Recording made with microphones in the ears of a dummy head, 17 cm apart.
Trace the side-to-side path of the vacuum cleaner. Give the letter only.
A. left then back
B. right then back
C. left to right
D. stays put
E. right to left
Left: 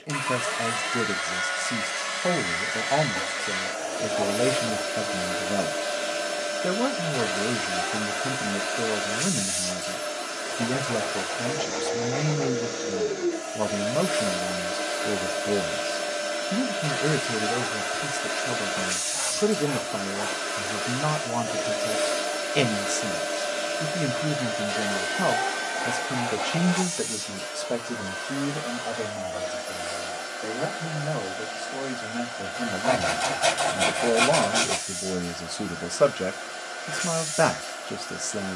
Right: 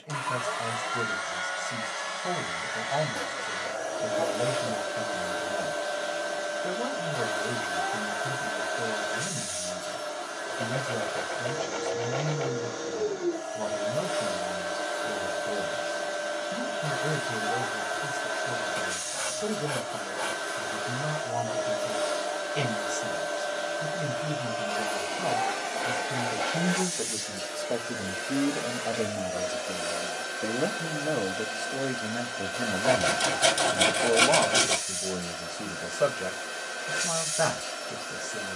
C.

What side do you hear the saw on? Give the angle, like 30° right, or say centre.
30° right.